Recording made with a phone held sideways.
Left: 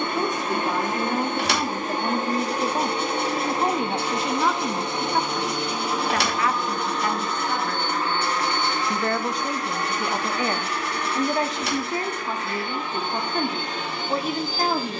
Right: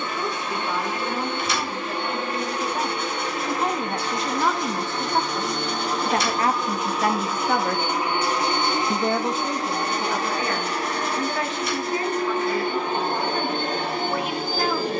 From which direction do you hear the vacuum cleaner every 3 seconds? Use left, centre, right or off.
left, left, centre, right, right.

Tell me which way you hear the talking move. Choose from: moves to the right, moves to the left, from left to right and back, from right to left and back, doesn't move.
from left to right and back.